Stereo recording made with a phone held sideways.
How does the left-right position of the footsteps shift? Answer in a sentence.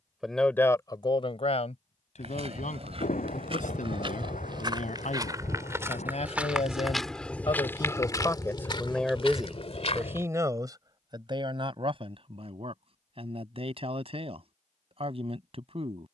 In this clip you hear the footsteps travel towards the left.